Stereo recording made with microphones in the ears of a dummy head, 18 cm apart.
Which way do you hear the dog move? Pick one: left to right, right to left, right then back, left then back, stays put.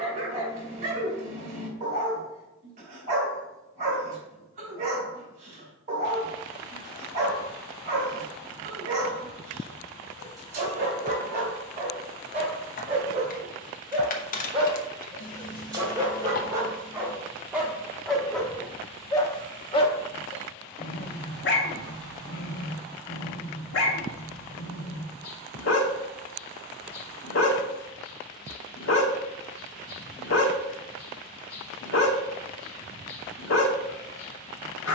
right to left.